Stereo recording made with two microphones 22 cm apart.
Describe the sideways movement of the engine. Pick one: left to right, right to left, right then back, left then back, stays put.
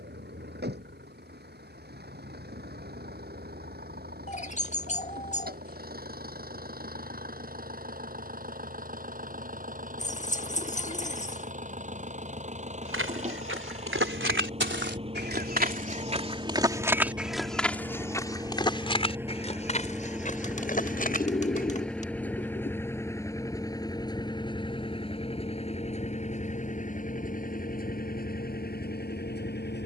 right to left.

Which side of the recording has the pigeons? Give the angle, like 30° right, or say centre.
30° left.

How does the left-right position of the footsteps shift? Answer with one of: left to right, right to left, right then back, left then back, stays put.
right to left.